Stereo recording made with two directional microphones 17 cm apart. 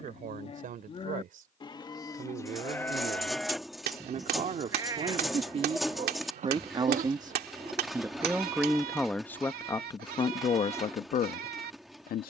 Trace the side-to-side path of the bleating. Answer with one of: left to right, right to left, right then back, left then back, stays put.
left to right.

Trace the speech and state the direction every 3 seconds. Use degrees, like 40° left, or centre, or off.
50° right, 40° right, 20° right, 30° left.